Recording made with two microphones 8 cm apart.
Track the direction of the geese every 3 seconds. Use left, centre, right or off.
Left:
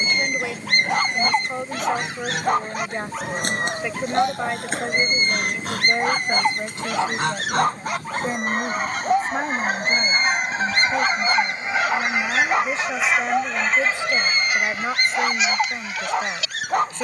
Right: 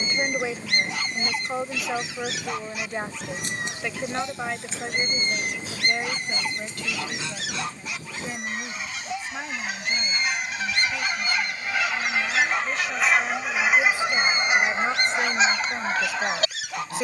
left, left, left, left, centre, right.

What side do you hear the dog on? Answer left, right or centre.
left.